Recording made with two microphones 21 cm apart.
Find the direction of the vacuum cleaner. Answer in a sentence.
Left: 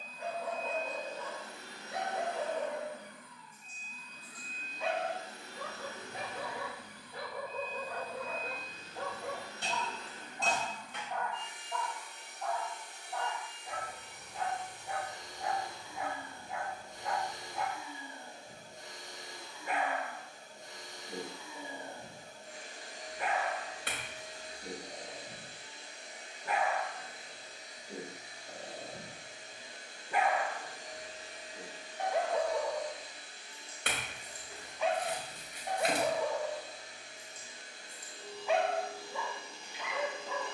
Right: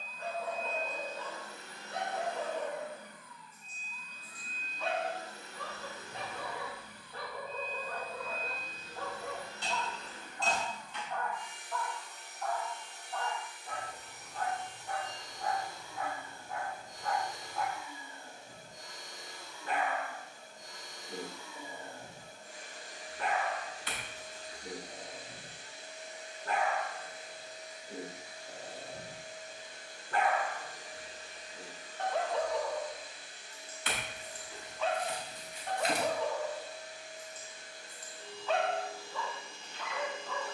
You can hear the vacuum cleaner on the left.